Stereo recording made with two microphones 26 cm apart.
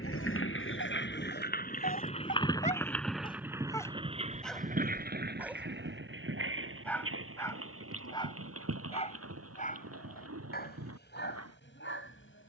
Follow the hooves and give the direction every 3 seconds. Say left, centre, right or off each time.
left, right, right, right.